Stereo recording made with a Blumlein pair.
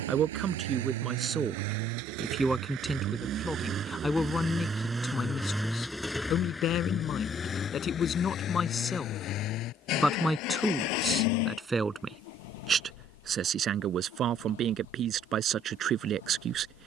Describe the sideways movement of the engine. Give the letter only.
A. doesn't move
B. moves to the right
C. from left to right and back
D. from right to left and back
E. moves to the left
E.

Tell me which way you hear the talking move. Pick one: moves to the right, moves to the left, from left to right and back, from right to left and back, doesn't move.
from right to left and back.